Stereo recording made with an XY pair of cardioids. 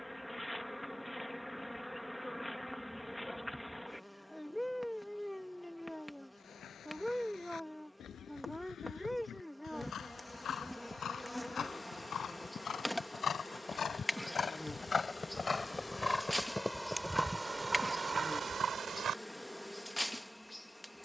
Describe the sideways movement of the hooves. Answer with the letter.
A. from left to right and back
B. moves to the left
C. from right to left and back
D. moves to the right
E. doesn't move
D.